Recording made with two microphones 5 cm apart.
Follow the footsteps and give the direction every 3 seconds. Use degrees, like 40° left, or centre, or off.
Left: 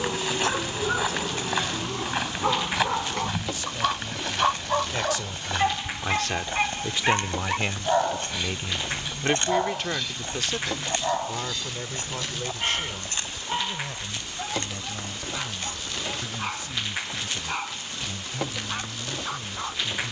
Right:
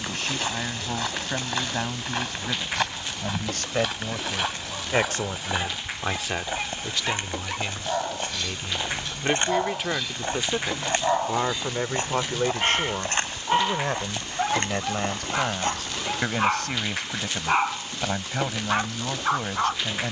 10° left, centre, 20° right, 30° right, 40° right, 50° right, off.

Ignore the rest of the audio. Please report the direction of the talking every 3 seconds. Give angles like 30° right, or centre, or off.
70° right, 50° right, 20° left, 20° right, 50° right, 70° right, 70° right.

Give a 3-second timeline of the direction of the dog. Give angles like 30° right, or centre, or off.
70° left, 50° left, 20° left, 10° right, 30° right, 40° right, 40° right.